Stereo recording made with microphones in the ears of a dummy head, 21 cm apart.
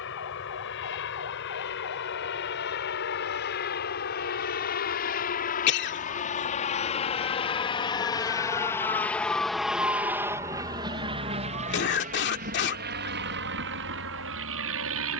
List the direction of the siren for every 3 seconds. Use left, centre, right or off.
left, left, left, right, right.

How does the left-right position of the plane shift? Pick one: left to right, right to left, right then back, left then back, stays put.
left to right.